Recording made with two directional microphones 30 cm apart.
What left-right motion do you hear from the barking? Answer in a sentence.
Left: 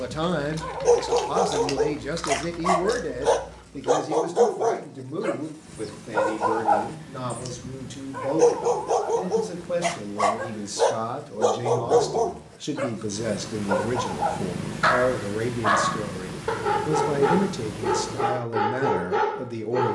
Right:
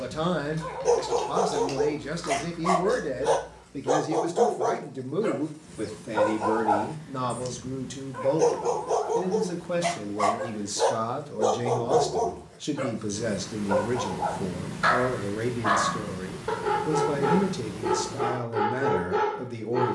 In this clip you hear the barking stay put.